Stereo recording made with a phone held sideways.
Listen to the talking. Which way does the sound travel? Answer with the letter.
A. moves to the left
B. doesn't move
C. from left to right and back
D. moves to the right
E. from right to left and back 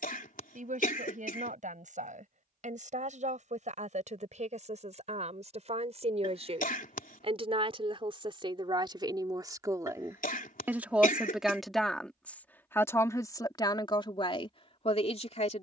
A.